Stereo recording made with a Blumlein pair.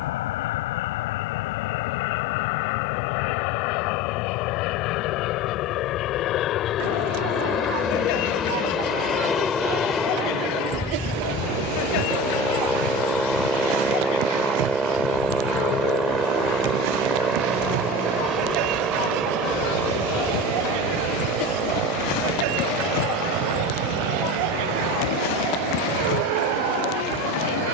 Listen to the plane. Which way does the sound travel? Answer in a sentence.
You can hear the plane go from the left side to the right.